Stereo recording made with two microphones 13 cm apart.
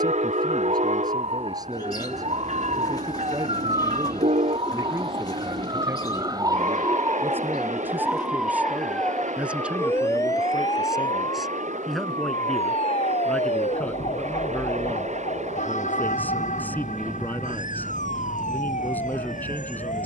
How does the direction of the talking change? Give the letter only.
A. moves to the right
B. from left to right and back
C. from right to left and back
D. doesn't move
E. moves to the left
E.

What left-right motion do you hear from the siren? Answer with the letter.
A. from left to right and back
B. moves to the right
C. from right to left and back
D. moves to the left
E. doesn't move
D.